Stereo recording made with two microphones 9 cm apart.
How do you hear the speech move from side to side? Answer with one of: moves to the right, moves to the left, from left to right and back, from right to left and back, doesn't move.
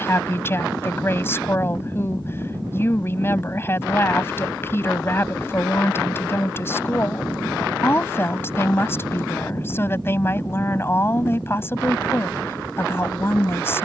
doesn't move.